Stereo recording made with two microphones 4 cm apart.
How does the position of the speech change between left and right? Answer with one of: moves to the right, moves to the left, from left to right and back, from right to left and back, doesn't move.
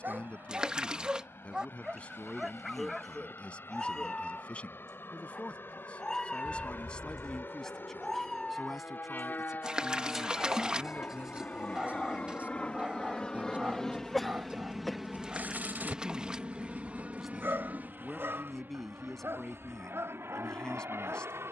from left to right and back.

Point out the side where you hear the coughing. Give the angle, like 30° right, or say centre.
centre.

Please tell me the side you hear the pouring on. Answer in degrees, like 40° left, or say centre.
20° right.